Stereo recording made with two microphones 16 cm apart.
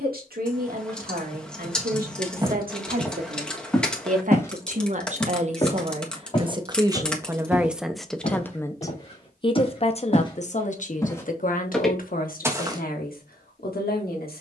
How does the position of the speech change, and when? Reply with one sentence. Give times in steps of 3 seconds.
In this clip you hear the speech on the right from 0 s, in the centre from 6 s and on the left from 9 s.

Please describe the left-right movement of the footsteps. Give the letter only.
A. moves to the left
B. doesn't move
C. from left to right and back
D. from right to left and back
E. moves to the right
D.